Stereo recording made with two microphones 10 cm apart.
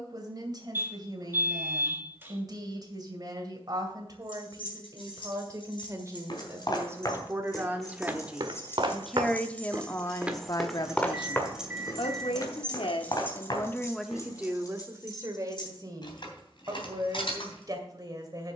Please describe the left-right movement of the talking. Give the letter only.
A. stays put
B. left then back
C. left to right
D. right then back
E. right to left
B.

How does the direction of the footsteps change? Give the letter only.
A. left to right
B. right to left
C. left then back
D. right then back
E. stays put
D.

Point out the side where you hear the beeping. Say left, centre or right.
right.